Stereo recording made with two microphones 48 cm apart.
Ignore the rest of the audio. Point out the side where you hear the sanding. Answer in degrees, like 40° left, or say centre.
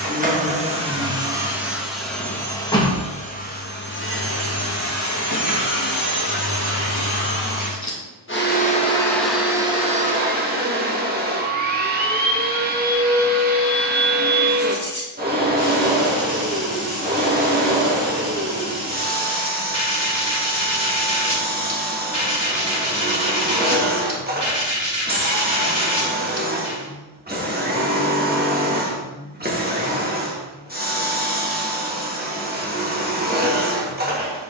60° left.